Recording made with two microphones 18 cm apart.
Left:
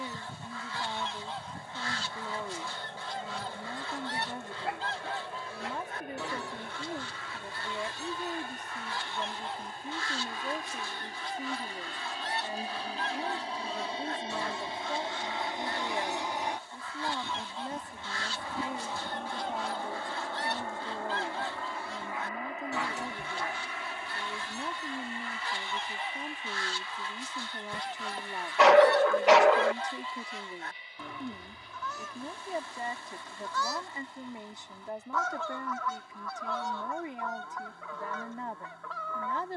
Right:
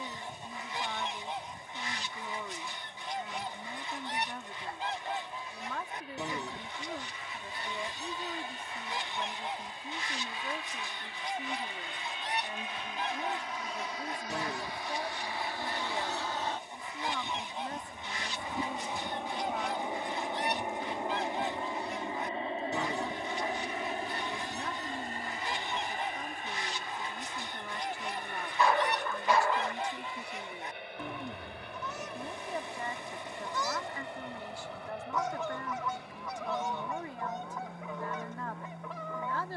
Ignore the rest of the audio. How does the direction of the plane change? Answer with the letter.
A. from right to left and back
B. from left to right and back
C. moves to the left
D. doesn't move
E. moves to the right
E.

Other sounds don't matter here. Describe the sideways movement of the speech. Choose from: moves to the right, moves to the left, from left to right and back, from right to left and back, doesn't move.
doesn't move.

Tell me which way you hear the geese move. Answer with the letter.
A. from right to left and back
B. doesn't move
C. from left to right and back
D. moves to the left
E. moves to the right
B.